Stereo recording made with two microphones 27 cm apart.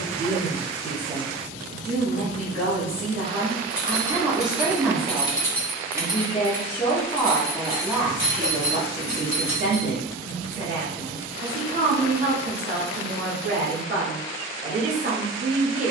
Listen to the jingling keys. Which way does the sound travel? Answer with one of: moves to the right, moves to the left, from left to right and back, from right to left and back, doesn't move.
moves to the right.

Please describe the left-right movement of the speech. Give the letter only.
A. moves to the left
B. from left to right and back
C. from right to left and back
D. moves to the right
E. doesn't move
C.